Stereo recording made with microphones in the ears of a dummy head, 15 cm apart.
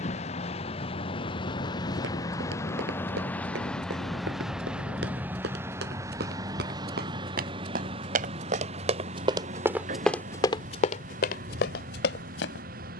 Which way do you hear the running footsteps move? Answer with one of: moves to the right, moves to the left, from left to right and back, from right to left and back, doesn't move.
moves to the left.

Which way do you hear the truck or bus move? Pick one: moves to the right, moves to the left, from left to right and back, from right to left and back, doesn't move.
moves to the right.